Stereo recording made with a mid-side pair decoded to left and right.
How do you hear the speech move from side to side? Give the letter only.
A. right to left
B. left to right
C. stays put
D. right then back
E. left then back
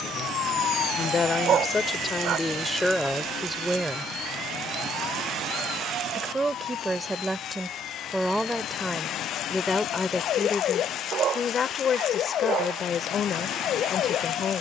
D.